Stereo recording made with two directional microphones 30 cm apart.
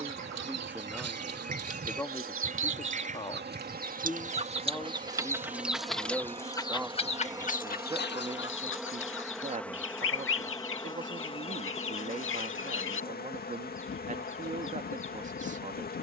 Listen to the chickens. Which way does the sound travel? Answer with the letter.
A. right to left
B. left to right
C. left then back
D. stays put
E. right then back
A.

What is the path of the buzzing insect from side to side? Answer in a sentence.
In this clip you hear the buzzing insect go from the right side to the left.